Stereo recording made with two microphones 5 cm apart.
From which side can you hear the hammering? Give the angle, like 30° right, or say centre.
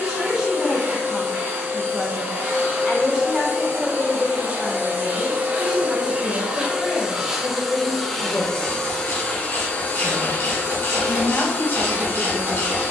50° right.